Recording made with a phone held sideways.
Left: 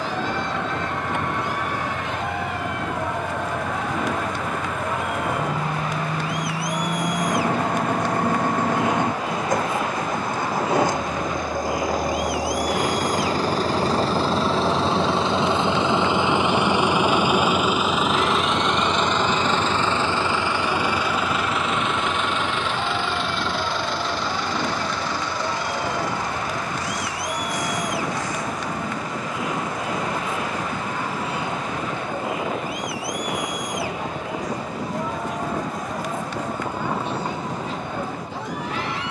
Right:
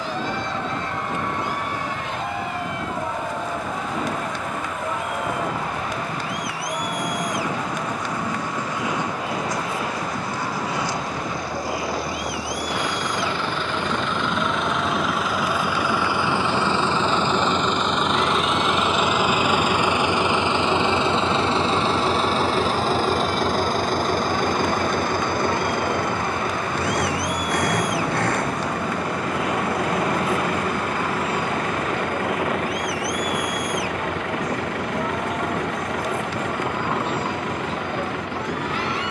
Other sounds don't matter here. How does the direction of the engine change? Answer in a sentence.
You can hear the engine move to the right.